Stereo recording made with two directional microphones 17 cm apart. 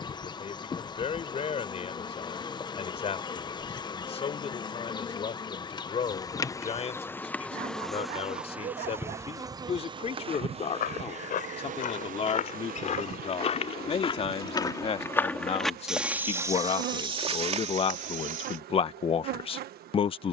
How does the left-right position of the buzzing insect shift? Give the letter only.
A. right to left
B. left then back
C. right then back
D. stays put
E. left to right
E.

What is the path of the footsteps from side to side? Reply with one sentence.
In this clip you hear the footsteps move from left to right.